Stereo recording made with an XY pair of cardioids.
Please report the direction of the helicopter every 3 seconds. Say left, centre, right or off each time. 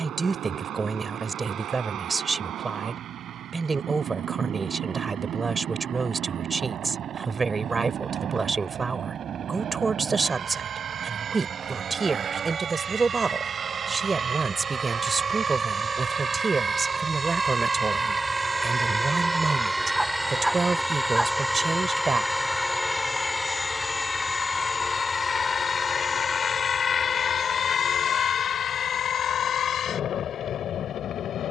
right, right, right, right, right, right, centre, centre, left, left, left.